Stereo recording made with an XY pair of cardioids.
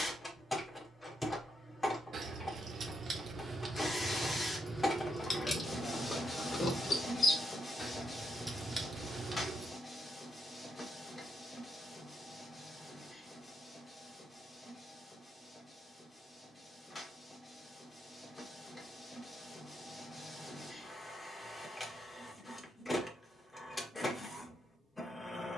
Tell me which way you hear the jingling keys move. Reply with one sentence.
In this clip you hear the jingling keys move from right to left and back again.